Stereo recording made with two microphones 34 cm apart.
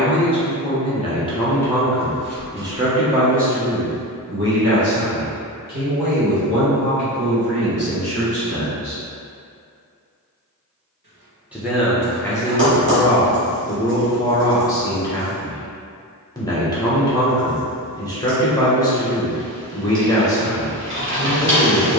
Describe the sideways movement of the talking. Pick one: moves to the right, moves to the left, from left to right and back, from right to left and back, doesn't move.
from left to right and back.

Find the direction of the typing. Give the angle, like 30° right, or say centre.
30° right.